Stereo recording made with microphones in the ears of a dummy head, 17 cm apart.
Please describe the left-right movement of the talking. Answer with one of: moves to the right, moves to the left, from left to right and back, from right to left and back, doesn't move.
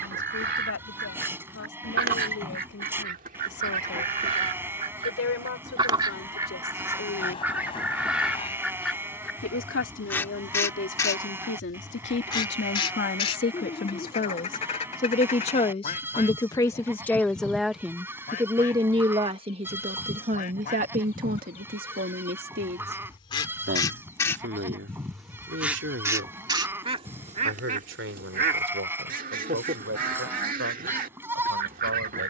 moves to the right.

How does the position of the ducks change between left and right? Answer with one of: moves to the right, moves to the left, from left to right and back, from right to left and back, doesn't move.
from right to left and back.